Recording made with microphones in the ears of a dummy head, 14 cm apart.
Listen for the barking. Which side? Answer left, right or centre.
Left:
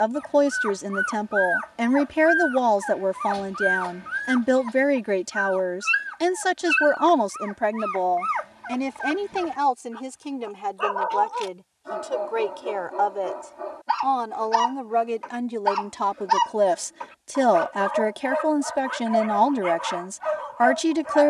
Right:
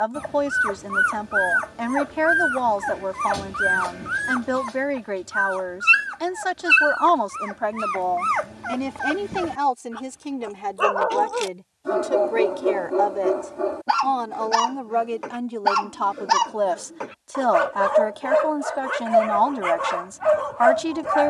right.